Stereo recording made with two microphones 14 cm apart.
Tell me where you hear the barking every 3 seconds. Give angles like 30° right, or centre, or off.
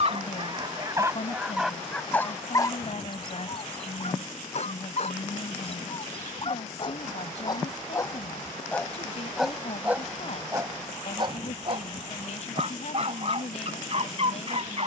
10° right, 50° left, 30° left, 20° right, 50° right.